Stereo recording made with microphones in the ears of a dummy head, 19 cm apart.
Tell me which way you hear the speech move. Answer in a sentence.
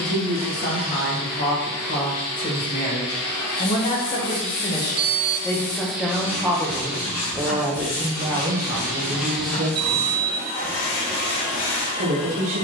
You can hear the speech travel towards the right.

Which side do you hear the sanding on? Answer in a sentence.
You can hear the sanding on the left.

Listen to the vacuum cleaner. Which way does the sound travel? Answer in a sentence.
In this clip you hear the vacuum cleaner move from left to right and back again.